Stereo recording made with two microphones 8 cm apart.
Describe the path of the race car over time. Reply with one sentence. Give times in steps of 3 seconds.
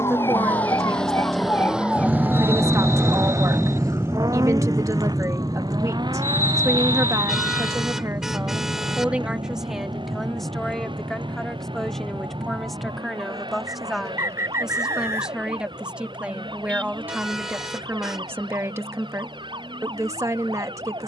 In this clip you hear the race car in the centre from 0 s and on the right from 3 s.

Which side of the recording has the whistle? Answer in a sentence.
In this clip you hear the whistle on the right.